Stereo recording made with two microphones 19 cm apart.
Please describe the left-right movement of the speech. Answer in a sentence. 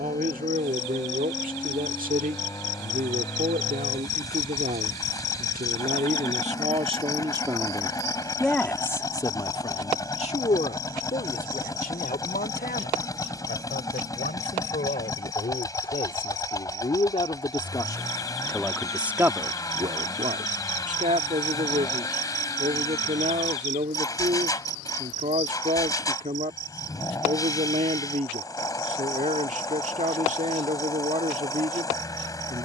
In this clip you hear the speech move from right to left and back again.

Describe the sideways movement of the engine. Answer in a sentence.
In this clip you hear the engine stay in one place.